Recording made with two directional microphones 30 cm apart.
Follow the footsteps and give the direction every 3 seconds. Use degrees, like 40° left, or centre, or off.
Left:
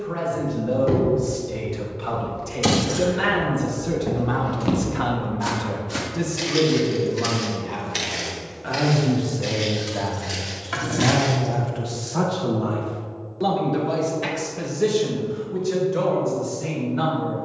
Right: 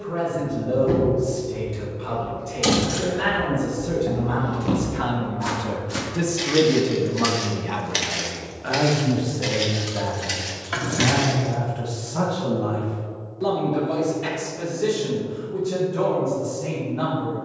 50° left, 30° left, 20° right, 60° right, off, off.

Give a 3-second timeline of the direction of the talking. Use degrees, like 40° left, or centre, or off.
50° left, 30° left, 30° right, 20° left, 40° left, 50° left.